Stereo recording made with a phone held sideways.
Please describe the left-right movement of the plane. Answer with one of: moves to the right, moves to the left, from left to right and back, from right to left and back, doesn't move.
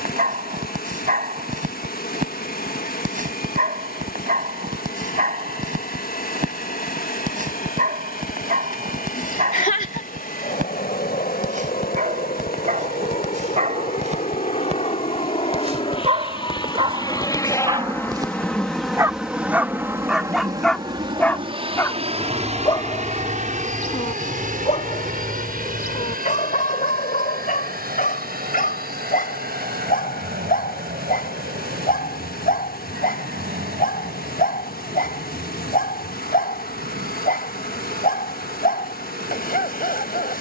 moves to the right.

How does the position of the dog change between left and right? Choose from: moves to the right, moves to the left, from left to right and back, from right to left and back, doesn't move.
moves to the left.